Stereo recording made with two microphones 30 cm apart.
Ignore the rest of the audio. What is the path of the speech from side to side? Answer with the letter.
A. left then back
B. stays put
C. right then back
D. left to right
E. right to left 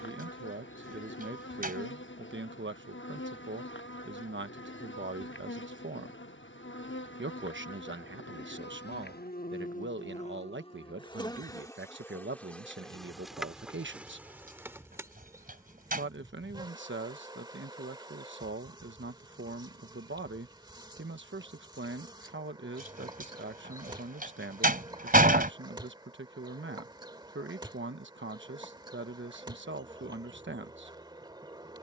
B.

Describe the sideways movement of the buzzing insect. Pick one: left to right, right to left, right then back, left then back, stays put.
left to right.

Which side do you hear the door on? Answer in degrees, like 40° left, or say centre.
30° right.